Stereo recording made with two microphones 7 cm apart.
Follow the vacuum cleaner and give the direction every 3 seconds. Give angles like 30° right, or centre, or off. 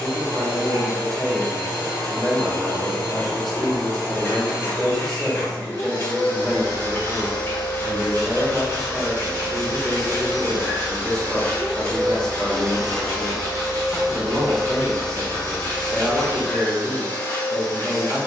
30° left, 30° left, 30° left, 30° left, centre, 20° left.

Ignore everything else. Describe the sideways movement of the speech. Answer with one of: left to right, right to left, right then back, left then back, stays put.
stays put.